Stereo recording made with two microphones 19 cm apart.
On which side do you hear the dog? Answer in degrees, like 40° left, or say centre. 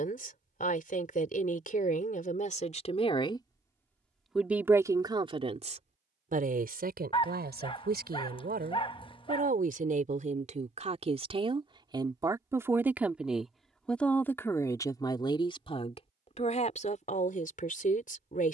30° left.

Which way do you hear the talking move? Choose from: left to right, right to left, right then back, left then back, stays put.
right then back.